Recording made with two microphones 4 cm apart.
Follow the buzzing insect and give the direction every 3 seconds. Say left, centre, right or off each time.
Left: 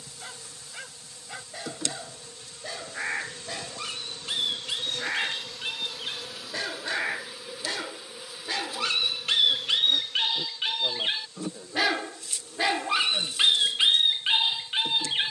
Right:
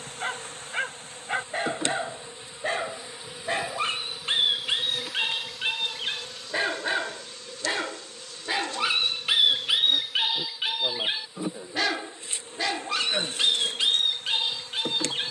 right, centre, centre, centre, right.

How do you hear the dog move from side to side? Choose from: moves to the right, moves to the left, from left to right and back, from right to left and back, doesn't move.
moves to the left.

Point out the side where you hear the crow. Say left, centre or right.
left.